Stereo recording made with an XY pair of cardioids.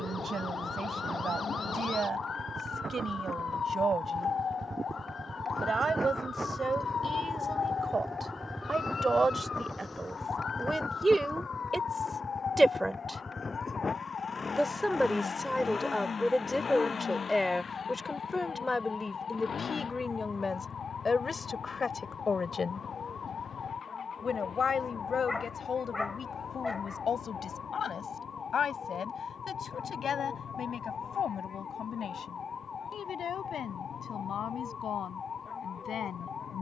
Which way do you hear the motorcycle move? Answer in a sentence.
In this clip you hear the motorcycle move from right to left.